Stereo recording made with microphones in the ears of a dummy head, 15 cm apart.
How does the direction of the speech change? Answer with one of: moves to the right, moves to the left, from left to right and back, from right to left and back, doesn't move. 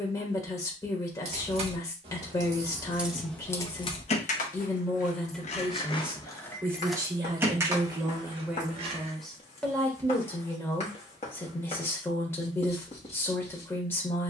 from left to right and back.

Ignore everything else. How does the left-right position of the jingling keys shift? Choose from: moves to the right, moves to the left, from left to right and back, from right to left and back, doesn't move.
from right to left and back.